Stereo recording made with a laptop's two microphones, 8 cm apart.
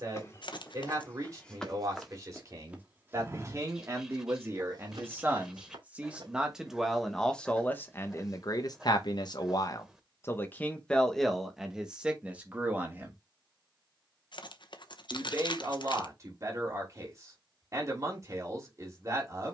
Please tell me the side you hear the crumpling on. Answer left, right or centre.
left.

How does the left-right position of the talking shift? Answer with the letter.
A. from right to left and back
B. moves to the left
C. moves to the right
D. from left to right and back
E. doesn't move
A.